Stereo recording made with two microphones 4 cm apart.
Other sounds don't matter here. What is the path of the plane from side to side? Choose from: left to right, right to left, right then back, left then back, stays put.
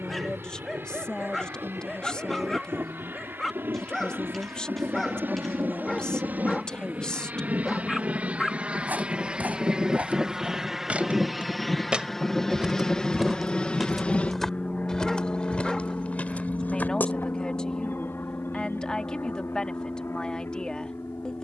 right to left.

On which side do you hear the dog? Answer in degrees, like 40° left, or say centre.
10° left.